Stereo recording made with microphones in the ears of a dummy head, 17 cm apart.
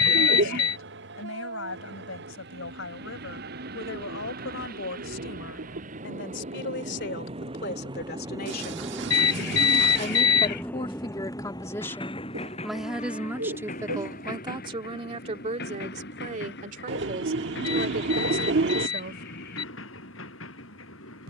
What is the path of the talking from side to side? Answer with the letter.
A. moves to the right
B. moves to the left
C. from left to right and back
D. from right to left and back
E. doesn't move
A.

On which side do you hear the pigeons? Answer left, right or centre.
right.